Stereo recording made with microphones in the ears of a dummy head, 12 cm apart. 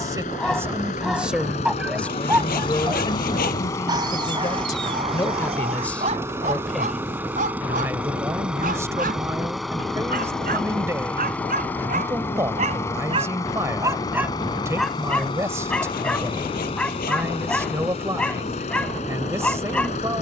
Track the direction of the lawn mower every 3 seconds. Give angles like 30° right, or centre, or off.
50° left, 10° left, 10° right, centre, 20° left, 40° left, 50° left.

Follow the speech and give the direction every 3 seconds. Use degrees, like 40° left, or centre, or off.
centre, 30° left, 10° right, 20° right, 20° right, 20° right, 20° right.